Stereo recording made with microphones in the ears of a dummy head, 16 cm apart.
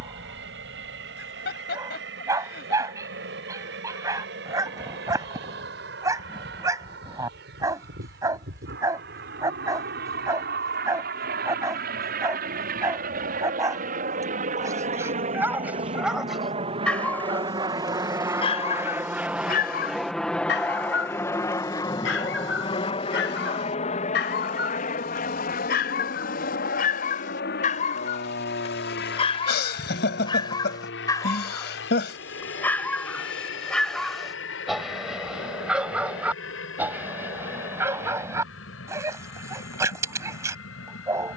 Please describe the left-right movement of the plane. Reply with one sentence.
In this clip you hear the plane go from the right side to the left.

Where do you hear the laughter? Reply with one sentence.
You can hear the laughter on the left.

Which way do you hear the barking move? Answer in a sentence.
In this clip you hear the barking move from right to left and back again.